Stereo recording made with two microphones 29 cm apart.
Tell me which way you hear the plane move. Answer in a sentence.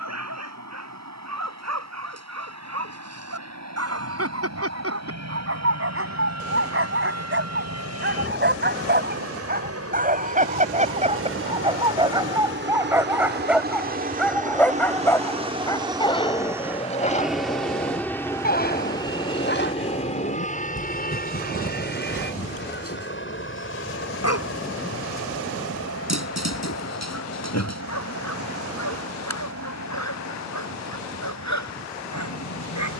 You can hear the plane move from right to left.